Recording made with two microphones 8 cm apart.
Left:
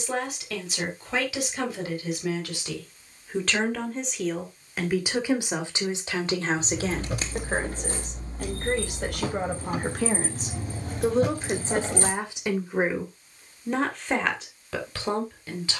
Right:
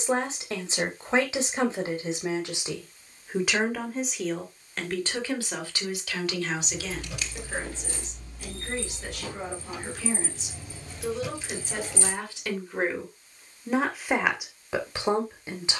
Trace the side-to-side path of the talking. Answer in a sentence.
You can hear the talking move from right to left and back again.